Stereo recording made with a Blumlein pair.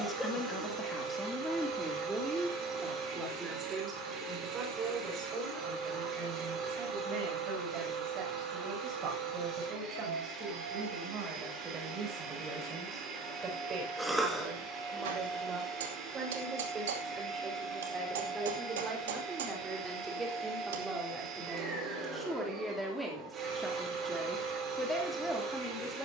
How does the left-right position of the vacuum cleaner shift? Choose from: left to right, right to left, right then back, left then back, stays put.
stays put.